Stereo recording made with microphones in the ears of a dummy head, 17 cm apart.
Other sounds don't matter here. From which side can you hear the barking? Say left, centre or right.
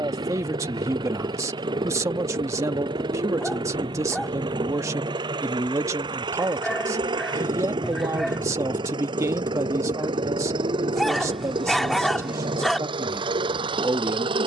centre.